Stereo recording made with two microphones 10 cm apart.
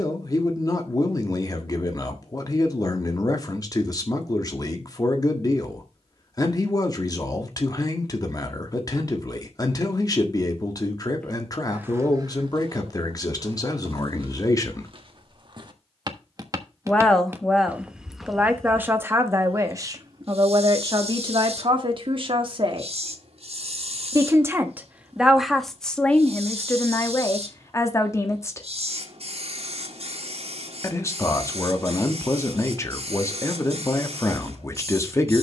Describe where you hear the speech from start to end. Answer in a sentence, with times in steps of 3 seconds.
You can hear the speech on the left from 0 s, in the centre from 15 s, on the right from 18 s, in the centre from 24 s and on the left from 27 s.